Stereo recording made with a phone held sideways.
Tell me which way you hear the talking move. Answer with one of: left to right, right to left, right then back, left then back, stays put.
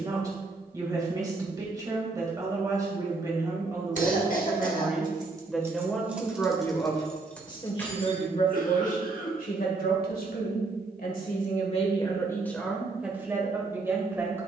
left then back.